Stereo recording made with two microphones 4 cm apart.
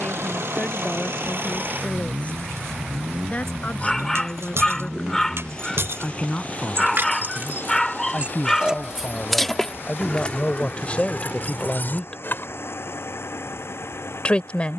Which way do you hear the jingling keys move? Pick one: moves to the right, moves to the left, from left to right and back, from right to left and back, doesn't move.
moves to the left.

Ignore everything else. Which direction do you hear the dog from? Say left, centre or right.
centre.